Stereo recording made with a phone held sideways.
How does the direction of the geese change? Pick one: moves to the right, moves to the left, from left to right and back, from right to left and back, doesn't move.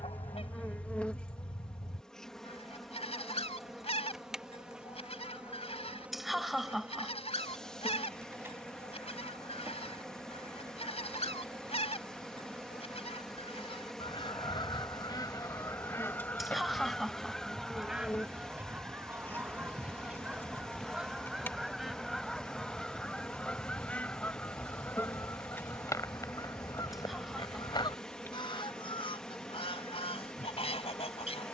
from left to right and back.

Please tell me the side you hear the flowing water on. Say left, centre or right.
centre.